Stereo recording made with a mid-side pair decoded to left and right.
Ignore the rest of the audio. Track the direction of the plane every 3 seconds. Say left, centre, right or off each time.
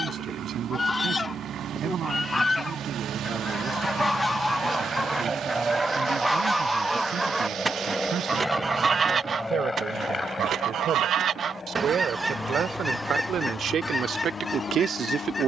right, right, centre, left, left.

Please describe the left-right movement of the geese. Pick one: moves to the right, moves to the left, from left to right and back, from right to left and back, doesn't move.
from left to right and back.